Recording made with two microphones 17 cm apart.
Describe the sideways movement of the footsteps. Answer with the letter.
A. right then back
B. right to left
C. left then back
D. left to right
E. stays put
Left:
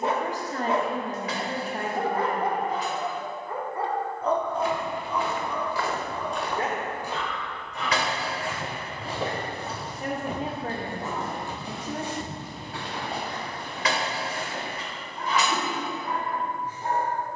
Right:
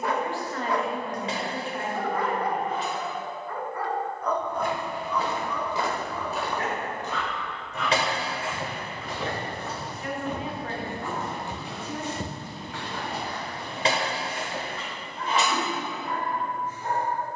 C.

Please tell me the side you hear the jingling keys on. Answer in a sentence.
You can hear the jingling keys on the right.